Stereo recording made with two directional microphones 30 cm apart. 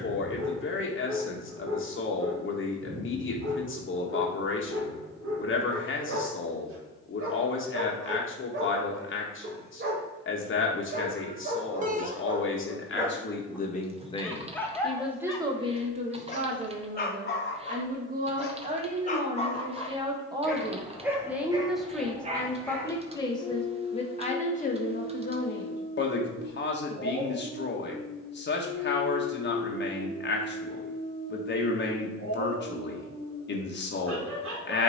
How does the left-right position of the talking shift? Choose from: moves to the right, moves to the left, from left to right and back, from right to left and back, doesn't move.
from left to right and back.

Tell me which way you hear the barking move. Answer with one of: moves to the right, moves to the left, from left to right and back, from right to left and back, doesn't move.
from right to left and back.